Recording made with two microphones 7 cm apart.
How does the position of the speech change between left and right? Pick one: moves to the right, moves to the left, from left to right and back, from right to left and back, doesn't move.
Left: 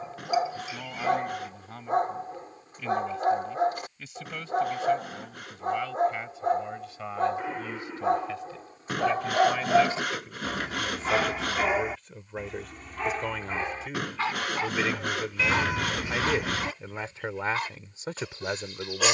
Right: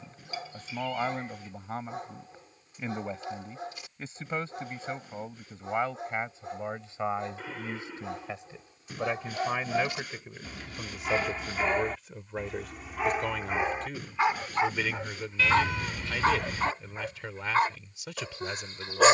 moves to the left.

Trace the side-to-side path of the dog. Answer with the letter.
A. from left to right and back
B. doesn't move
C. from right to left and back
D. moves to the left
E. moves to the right
E.